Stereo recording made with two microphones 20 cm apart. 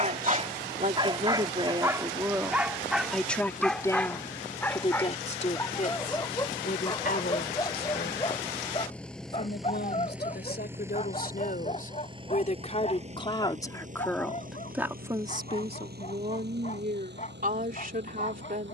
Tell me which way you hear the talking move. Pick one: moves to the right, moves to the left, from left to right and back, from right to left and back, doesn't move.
from right to left and back.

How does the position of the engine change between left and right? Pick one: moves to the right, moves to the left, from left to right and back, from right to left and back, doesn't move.
moves to the right.